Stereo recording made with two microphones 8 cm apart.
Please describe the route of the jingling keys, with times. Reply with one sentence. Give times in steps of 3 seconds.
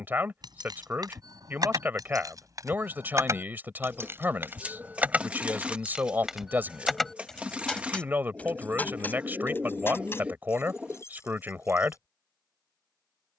In this clip you hear the jingling keys on the right from 0 s, in the centre from 6 s, on the left from 9 s and not at all from 12 s.